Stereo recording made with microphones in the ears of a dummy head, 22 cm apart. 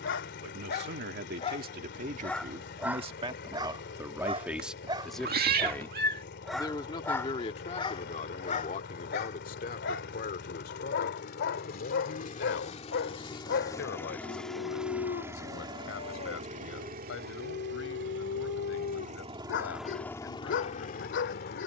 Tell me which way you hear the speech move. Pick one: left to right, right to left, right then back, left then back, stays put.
right to left.